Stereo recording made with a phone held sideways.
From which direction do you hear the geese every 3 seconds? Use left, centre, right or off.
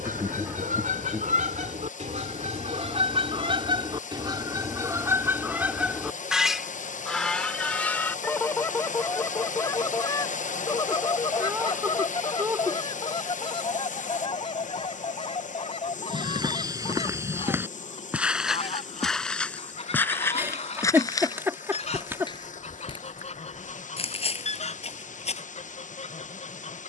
right, right, centre, left, left, left, left, left, left.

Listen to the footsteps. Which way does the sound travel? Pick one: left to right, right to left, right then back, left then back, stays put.
right to left.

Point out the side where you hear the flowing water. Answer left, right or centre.
left.